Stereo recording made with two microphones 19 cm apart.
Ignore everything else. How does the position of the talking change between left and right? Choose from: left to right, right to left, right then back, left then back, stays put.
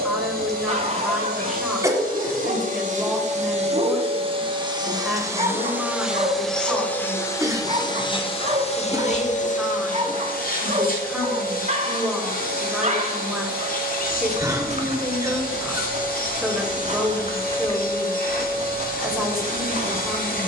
stays put.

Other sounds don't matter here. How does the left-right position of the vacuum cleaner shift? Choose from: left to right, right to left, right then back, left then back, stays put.
right to left.